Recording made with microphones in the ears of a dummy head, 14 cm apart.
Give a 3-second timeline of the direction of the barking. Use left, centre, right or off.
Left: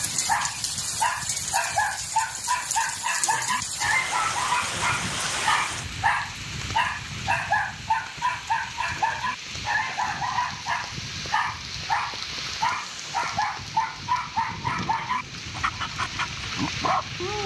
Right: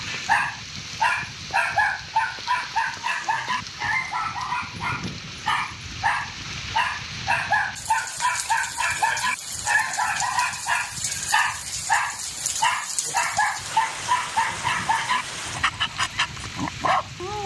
right, centre, right, right, right, right.